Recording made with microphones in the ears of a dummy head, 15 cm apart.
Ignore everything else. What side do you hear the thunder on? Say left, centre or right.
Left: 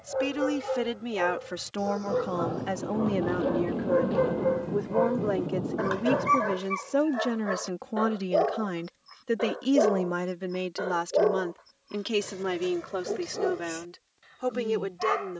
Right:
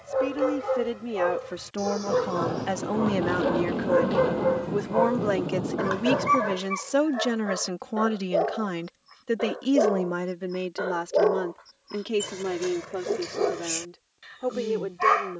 right.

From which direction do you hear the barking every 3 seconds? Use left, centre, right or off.
right, right, centre, centre, right.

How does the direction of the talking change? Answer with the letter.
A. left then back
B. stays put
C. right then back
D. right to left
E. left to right
C.